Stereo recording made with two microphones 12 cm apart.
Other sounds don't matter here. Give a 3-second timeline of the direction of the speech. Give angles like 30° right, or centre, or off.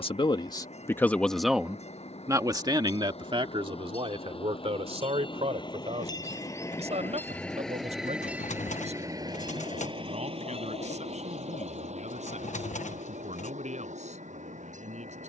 centre, 50° right, 60° right, 70° right, 70° right.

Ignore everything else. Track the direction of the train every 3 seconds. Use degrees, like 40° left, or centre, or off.
60° left, 50° left, 10° left, 50° right, 70° right.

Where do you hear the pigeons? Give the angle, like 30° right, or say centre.
80° left.